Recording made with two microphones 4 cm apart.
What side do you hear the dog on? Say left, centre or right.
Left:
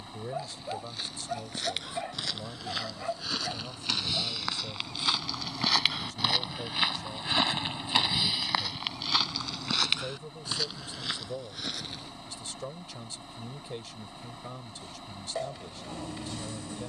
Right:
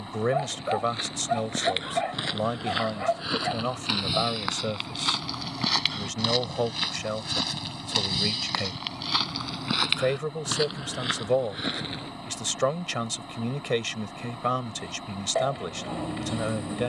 right.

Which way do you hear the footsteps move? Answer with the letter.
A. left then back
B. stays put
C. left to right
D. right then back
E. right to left
A.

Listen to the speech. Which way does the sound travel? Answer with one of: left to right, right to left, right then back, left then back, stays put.
stays put.